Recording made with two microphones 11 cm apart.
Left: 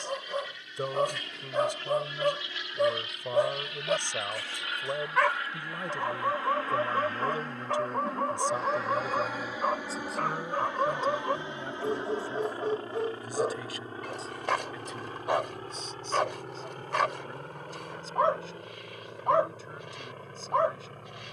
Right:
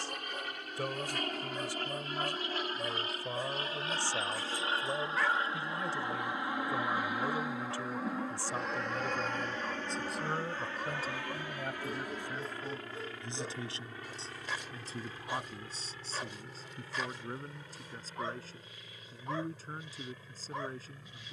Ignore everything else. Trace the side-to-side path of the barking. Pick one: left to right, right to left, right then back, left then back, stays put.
stays put.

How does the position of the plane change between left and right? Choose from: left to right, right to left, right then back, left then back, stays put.
right to left.